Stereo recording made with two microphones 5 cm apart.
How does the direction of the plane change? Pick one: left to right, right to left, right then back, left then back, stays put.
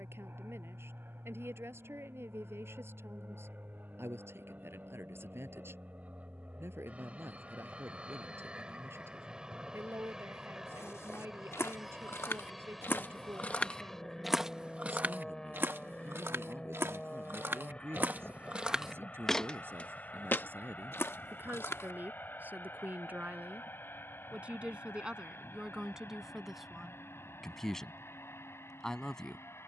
right to left.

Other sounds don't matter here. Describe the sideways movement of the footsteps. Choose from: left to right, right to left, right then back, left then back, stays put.
right then back.